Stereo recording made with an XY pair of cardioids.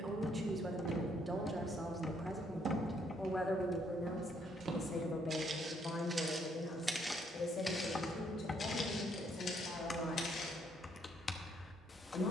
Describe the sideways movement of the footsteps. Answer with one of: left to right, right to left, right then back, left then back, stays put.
right to left.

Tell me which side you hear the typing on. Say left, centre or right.
left.